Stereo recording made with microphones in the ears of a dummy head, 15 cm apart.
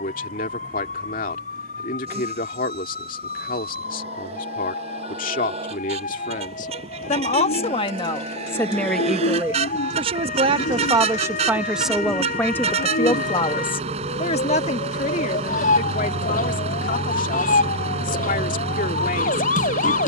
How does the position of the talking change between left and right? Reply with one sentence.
In this clip you hear the talking move from left to right and back again.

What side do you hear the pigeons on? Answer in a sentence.
In this clip you hear the pigeons on the left.